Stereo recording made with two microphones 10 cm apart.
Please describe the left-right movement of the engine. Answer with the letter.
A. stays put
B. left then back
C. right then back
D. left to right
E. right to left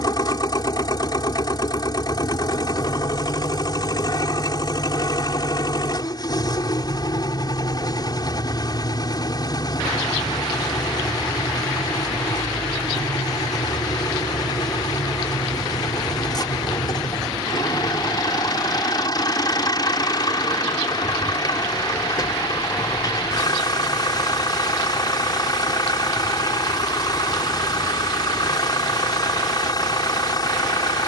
A.